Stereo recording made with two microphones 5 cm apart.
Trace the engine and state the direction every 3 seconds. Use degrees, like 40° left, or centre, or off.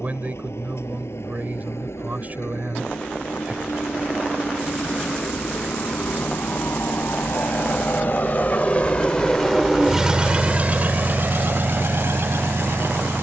80° left, 70° left, 50° left, 30° right, 70° right.